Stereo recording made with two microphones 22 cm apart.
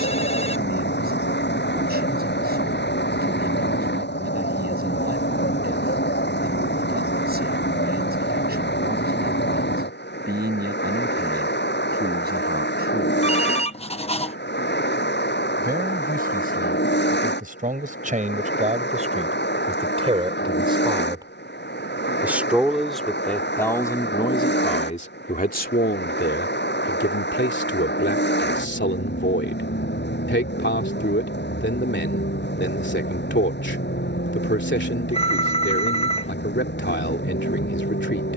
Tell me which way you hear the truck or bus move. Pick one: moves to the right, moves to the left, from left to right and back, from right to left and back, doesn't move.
doesn't move.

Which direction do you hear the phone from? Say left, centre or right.
left.